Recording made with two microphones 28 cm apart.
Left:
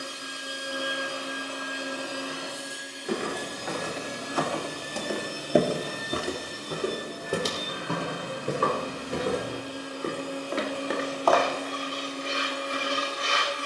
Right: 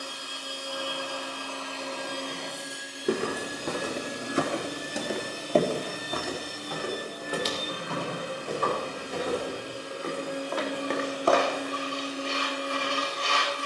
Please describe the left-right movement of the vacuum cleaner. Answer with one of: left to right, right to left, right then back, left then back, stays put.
right then back.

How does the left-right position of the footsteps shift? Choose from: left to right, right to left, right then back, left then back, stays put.
left then back.